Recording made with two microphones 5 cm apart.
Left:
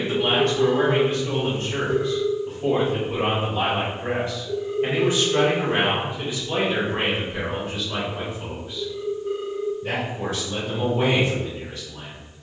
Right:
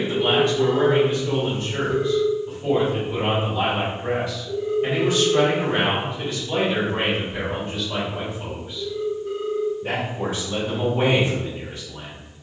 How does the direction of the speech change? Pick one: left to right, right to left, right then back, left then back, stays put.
left to right.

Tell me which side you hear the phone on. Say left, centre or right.
centre.